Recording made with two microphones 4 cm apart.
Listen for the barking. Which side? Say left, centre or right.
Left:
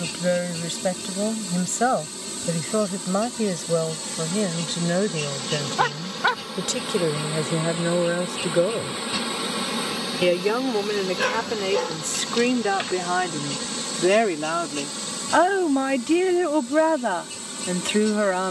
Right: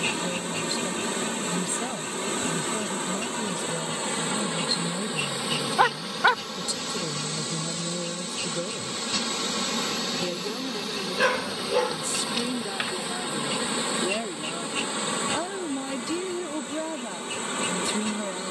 centre.